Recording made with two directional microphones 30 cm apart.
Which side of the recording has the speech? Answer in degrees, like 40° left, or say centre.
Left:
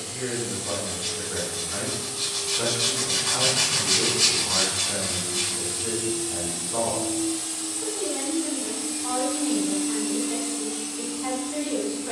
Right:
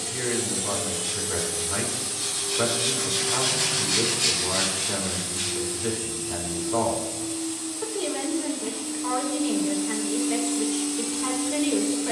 50° right.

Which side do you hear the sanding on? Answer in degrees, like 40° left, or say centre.
50° left.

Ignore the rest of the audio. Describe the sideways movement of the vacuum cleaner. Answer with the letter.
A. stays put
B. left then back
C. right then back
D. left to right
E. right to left
B.